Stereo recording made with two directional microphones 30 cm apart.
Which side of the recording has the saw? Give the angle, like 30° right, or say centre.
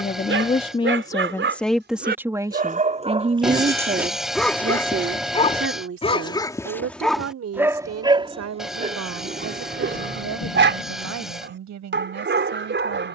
centre.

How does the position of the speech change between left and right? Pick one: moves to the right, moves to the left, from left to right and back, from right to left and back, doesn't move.
moves to the right.